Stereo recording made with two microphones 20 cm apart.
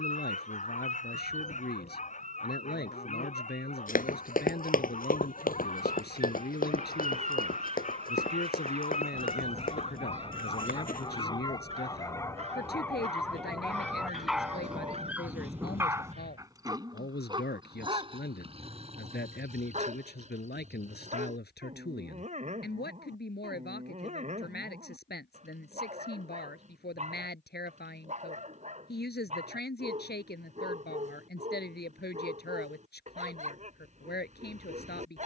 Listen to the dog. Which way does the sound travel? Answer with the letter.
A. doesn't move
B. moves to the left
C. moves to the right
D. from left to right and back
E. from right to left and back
C.